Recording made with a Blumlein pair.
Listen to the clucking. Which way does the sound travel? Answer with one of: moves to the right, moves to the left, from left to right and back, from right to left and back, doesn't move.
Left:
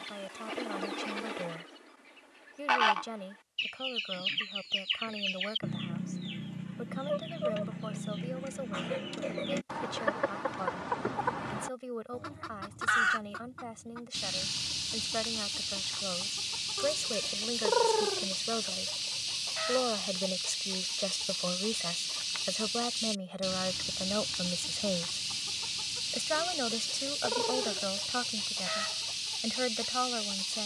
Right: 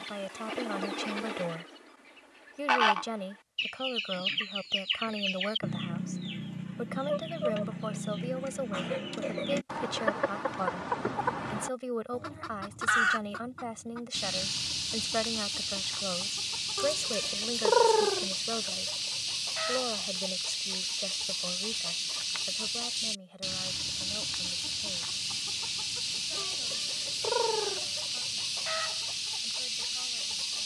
doesn't move.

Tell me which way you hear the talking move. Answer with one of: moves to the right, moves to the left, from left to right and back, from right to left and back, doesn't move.
moves to the left.